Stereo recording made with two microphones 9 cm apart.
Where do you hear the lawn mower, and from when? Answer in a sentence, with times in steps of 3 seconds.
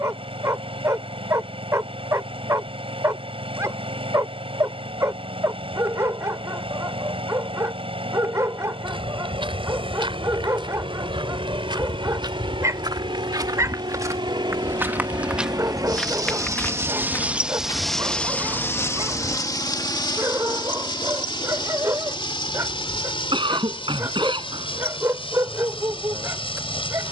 In this clip you hear the lawn mower on the right from 0 s and on the left from 18 s.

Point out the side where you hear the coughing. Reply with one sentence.
In this clip you hear the coughing on the right.